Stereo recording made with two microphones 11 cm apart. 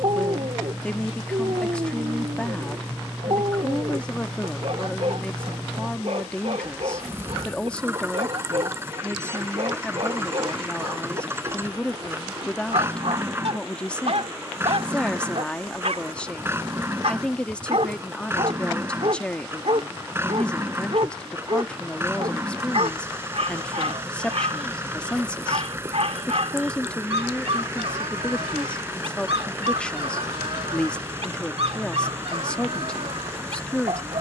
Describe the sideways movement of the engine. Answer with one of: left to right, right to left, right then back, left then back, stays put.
stays put.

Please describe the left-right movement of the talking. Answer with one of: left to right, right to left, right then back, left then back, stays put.
stays put.